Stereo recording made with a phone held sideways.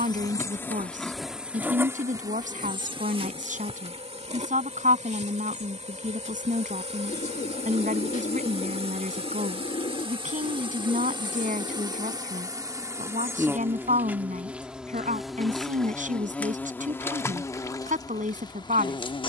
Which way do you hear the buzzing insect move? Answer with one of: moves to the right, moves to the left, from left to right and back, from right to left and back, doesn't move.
from left to right and back.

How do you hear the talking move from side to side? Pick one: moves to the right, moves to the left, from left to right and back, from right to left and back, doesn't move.
doesn't move.